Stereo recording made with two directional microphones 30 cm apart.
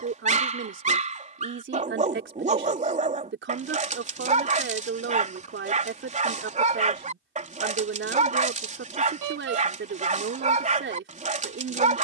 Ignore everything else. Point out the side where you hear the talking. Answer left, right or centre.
right.